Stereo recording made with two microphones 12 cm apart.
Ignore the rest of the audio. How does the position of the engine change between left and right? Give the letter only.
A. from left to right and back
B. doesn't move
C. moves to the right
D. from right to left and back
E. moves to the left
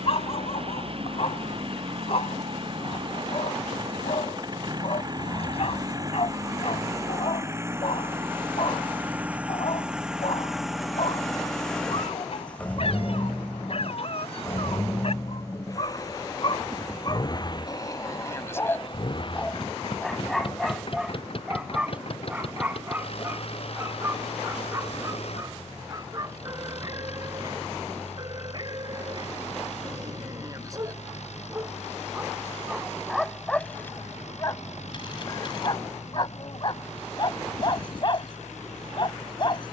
E.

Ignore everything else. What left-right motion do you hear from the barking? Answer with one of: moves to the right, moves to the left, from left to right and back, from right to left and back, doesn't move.
from left to right and back.